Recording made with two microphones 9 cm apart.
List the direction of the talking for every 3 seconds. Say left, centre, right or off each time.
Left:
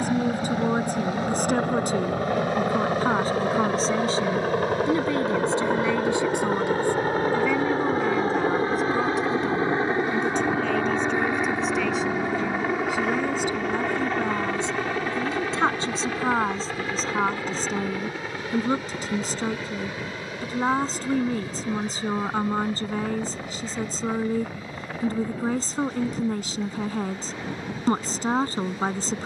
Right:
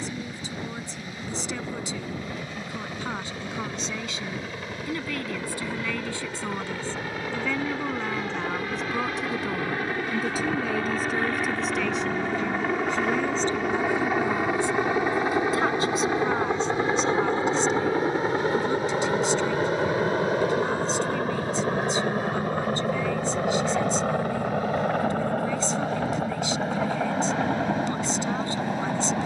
left, left, centre, centre, centre, left, left, left, left, left.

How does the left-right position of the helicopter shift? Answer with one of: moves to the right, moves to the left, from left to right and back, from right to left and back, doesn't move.
moves to the right.